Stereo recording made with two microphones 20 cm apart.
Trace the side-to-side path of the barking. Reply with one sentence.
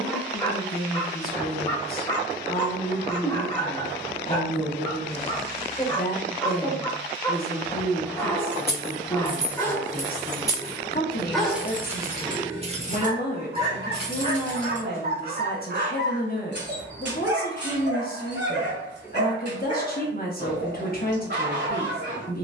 You can hear the barking move to the right.